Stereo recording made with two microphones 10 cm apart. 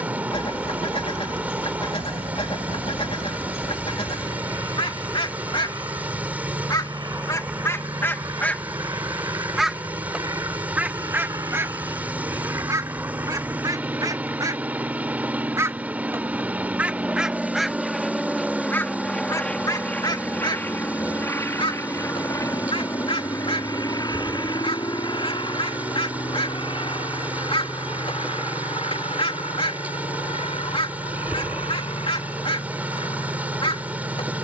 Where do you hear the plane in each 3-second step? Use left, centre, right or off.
right, right, right, right, right, centre, centre, left, left, left, left, left.